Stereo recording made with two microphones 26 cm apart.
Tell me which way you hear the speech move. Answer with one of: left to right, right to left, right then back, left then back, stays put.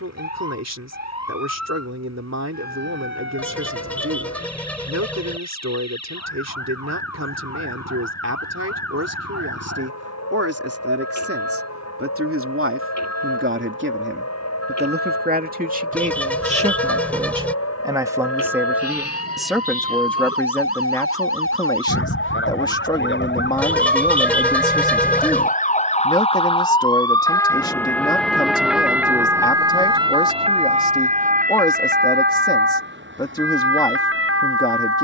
right to left.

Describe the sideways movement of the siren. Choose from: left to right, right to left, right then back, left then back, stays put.
left to right.